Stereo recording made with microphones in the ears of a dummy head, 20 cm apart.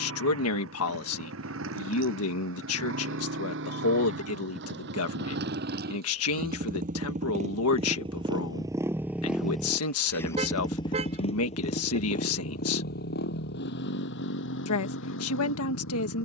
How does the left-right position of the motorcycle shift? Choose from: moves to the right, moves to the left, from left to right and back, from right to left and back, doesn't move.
moves to the left.